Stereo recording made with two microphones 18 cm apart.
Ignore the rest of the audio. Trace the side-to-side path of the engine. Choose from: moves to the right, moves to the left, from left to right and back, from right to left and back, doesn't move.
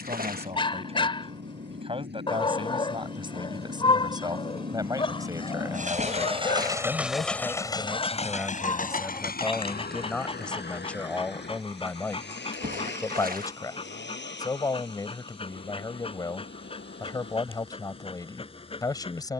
moves to the left.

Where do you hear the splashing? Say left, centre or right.
right.